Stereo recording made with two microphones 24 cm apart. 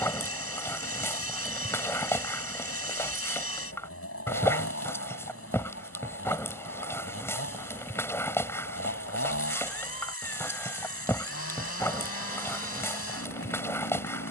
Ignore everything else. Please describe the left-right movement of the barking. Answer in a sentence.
You can hear the barking stay in one place.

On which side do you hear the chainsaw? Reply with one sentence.
You can hear the chainsaw on the left.